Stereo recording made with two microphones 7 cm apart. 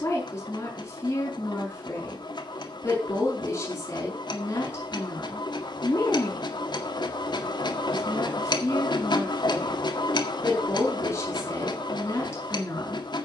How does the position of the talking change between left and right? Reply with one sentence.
In this clip you hear the talking stay put.